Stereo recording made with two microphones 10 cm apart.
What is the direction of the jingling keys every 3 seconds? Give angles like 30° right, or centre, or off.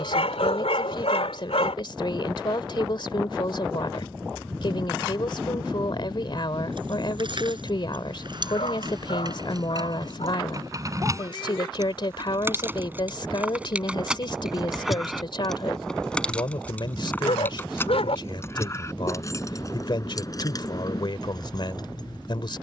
off, off, 50° right, 40° right, 10° right, 10° left, 30° left, 40° left.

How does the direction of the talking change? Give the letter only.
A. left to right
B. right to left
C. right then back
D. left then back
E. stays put
E.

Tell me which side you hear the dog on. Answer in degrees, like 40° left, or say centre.
80° left.